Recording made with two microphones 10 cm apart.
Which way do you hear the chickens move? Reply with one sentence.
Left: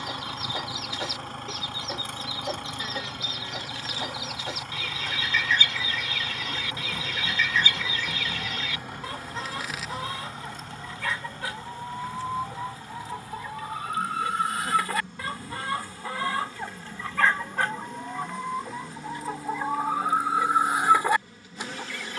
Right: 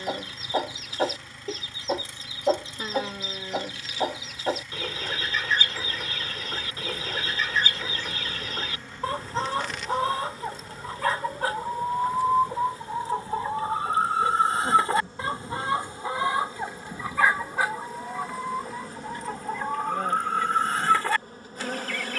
You can hear the chickens move from right to left.